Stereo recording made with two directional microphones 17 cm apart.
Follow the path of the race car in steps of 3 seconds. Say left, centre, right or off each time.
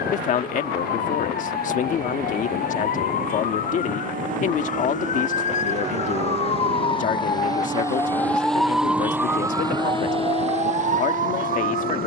right, right, right, left.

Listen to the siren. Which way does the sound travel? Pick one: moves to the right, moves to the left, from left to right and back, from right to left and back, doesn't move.
moves to the right.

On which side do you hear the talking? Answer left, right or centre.
left.